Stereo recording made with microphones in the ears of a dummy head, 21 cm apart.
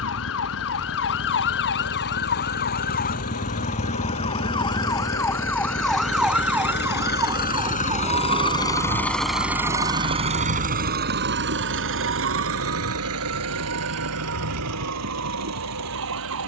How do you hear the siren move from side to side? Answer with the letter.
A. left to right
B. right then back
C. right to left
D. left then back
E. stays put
A.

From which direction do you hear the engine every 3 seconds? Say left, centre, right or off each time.
left, left, left, right, right, right.